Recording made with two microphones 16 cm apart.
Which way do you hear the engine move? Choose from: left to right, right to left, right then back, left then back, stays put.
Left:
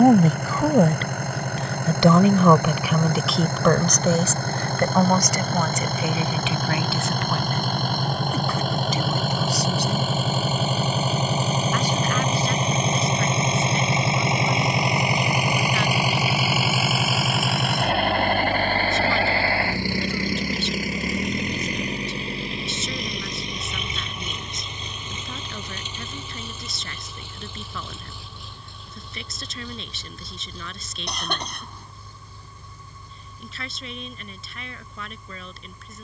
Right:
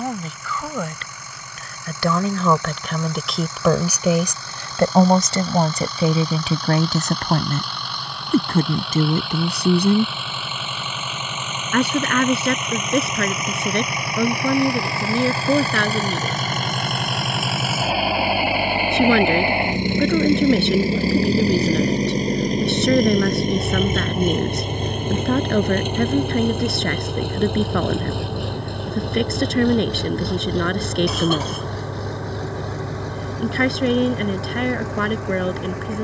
left to right.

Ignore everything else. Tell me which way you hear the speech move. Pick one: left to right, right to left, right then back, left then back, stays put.
left to right.